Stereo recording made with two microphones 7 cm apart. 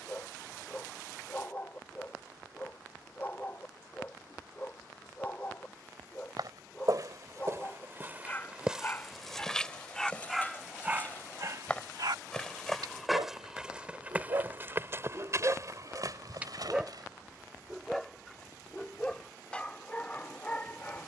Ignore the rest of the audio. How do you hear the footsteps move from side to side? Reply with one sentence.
In this clip you hear the footsteps go left and come back.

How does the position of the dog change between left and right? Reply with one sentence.
In this clip you hear the dog move from left to right and back again.